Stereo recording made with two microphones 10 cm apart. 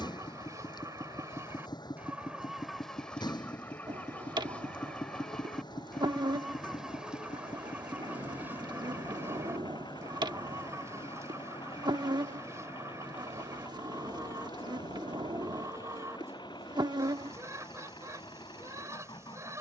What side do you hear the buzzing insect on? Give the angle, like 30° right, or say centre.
50° right.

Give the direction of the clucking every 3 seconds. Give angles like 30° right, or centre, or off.
20° right, 10° left, 10° right, 30° right, 30° right, 30° right, 30° right.